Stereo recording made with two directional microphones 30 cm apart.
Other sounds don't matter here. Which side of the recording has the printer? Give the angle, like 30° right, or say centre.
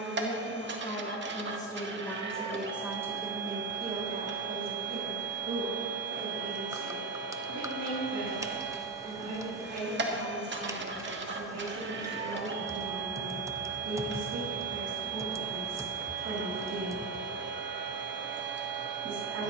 40° right.